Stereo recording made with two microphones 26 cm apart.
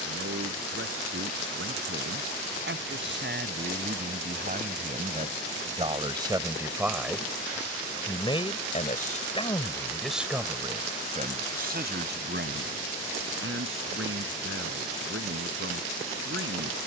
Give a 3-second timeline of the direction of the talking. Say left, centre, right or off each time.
right, right, centre, centre, right, right.